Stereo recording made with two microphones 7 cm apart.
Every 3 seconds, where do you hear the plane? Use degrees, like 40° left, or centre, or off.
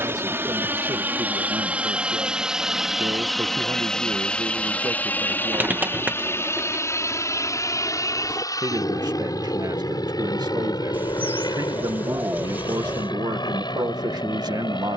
20° right, 10° left, 40° left, 60° left, 60° left.